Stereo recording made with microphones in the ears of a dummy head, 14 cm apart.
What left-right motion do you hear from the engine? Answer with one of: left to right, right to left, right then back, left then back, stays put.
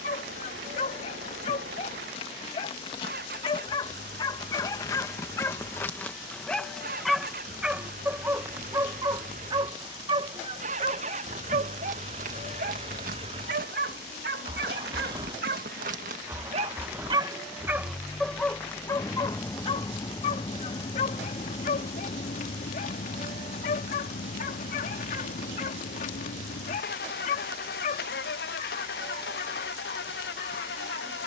right to left.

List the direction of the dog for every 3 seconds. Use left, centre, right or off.
left, left, centre, right, right, right, left, left, left, left, left.